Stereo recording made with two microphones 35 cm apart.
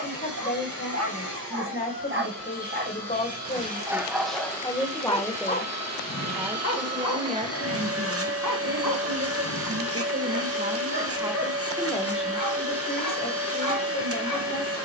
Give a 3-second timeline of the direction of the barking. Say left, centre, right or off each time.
right, centre, left, left, left.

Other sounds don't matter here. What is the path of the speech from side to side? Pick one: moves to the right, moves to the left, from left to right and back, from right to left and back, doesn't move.
from left to right and back.